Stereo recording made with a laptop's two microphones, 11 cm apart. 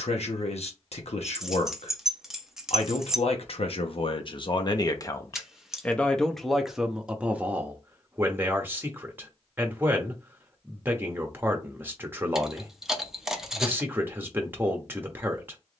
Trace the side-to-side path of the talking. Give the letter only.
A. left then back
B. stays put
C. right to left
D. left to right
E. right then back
D.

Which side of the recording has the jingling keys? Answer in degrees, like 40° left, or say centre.
centre.